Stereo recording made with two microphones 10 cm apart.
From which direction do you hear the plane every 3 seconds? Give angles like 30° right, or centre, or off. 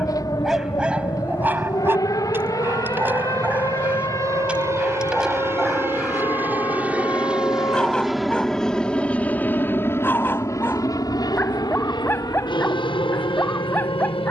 50° right, 40° right, 10° right, 30° left, 60° left.